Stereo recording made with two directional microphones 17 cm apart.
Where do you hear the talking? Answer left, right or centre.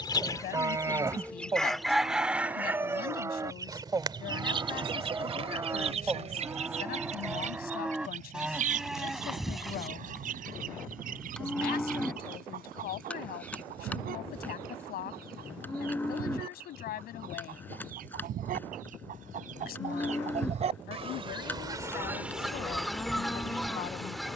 left.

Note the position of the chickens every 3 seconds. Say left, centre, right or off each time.
centre, right, right, right, right, right, right, centre.